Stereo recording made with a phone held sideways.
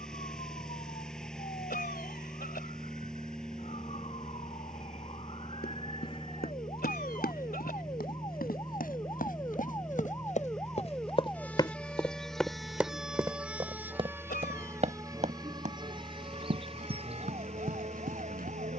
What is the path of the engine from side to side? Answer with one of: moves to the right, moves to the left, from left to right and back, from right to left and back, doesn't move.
doesn't move.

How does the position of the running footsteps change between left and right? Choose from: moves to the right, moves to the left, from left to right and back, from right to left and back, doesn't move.
moves to the right.